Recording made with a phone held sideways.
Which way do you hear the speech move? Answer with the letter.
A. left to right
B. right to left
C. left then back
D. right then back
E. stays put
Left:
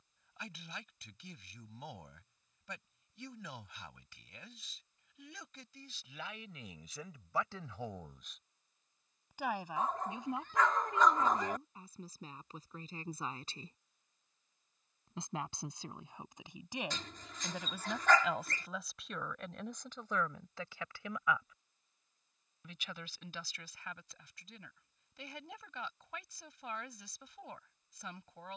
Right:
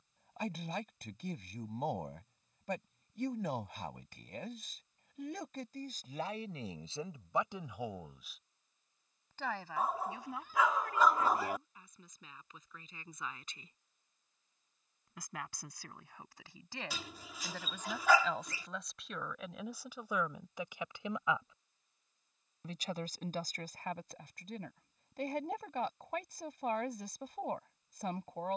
C.